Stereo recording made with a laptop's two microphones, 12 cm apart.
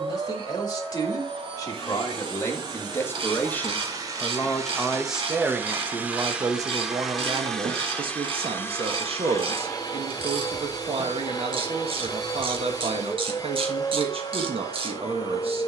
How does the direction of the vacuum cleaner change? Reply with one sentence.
You can hear the vacuum cleaner go from the right side to the left.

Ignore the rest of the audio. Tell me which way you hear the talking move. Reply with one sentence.
In this clip you hear the talking move to the right.